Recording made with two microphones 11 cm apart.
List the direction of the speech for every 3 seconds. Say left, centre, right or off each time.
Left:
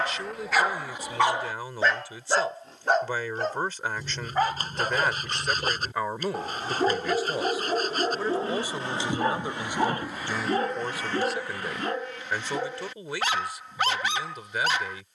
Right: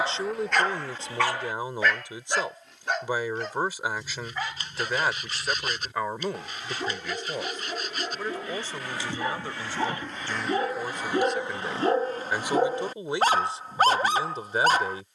right, centre, centre, centre, right.